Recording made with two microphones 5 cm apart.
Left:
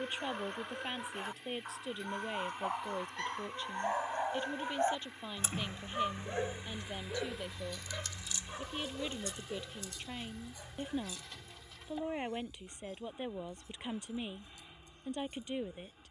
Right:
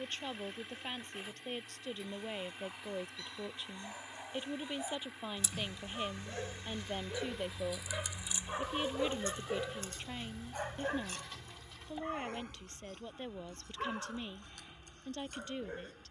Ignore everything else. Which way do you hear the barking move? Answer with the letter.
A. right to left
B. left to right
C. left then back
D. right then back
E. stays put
B.